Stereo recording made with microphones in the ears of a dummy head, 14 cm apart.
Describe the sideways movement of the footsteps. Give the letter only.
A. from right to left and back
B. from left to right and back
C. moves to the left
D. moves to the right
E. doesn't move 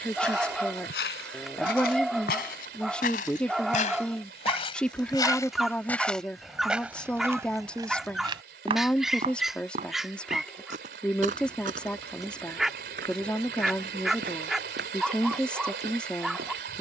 D.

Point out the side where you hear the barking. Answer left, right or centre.
centre.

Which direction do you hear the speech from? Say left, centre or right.
centre.